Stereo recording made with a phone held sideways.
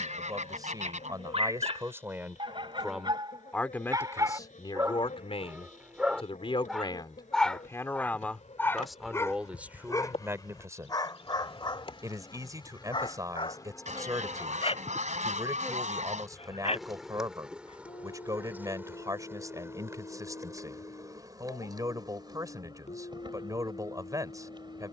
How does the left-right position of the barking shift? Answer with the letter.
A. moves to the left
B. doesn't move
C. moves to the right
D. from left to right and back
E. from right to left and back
A.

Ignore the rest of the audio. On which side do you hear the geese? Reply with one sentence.
In this clip you hear the geese on the right.